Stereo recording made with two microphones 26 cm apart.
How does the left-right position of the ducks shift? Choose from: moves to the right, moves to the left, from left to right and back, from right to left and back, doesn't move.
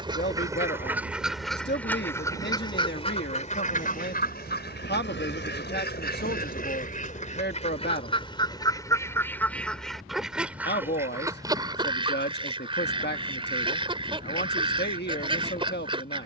from right to left and back.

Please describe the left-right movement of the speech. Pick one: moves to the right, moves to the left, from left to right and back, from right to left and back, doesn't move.
doesn't move.